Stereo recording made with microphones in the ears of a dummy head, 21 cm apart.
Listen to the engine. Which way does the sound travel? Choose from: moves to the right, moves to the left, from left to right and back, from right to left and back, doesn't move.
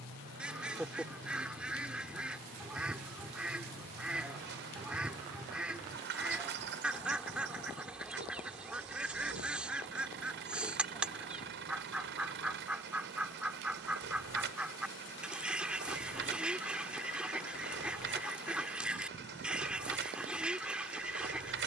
doesn't move.